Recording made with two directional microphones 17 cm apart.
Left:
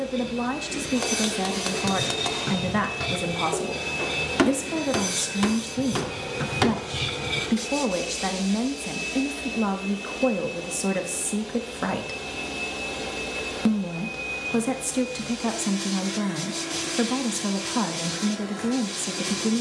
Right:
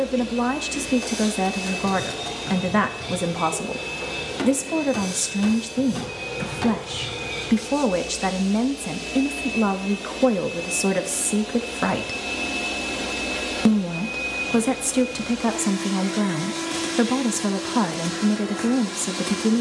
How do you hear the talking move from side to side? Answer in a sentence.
You can hear the talking stay put.